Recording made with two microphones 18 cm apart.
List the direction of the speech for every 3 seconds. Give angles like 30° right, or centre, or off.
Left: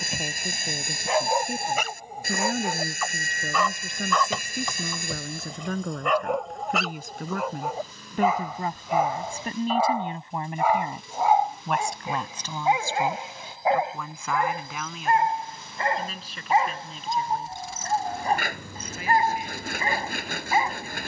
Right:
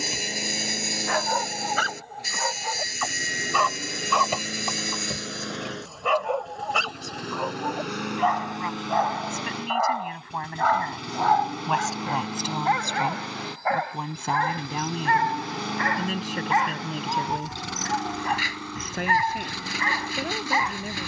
80° left, 70° left, 50° left, 20° left, 20° right, 50° right, 60° right.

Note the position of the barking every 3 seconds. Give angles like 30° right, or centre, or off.
20° left, centre, centre, 10° left, 20° left, 30° left, 30° left.